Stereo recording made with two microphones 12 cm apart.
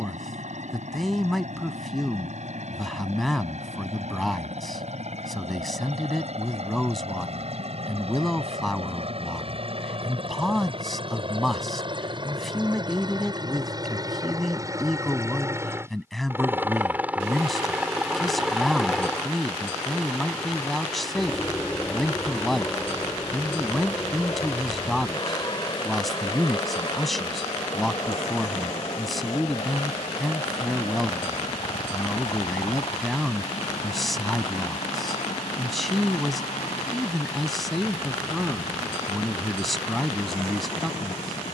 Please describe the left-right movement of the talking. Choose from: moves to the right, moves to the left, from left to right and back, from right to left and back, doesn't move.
doesn't move.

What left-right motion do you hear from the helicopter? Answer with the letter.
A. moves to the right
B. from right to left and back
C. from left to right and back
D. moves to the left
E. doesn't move
D.